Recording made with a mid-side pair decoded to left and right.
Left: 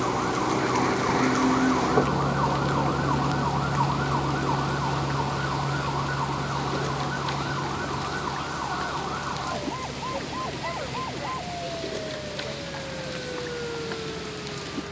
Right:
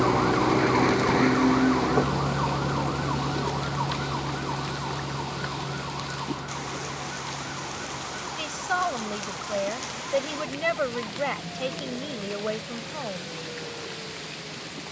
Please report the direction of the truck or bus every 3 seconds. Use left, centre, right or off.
centre, left, left, left, left.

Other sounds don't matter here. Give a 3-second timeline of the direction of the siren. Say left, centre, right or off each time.
centre, left, left, left, left.